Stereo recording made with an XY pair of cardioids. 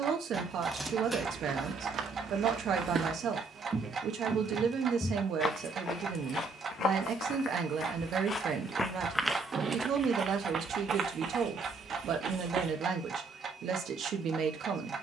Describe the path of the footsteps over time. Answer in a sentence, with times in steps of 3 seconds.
In this clip you hear the footsteps on the right from 0 s, in the centre from 3 s, on the left from 6 s and on the right from 9 s.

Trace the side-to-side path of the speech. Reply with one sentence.
You can hear the speech stay in one place.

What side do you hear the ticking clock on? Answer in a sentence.
In this clip you hear the ticking clock on the right.